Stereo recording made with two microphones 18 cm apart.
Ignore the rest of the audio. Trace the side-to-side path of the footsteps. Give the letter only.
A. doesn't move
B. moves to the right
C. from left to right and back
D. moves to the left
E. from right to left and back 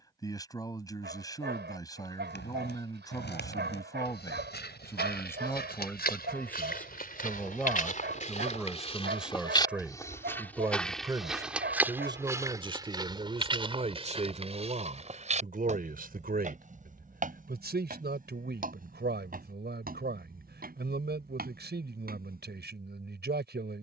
B.